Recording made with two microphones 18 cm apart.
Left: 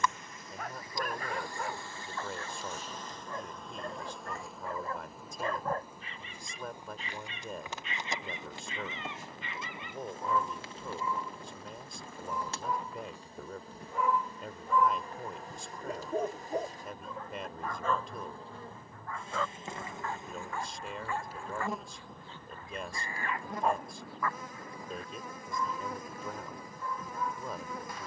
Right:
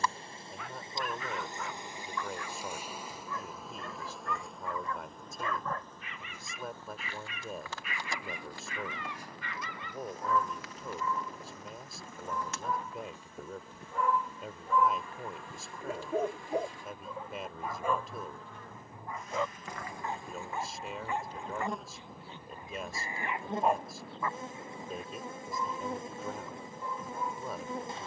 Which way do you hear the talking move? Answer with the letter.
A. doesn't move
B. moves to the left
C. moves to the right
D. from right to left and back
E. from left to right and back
A.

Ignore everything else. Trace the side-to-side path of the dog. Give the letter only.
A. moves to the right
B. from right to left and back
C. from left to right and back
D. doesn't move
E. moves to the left
A.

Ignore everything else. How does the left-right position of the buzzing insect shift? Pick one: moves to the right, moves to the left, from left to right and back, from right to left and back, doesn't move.
from right to left and back.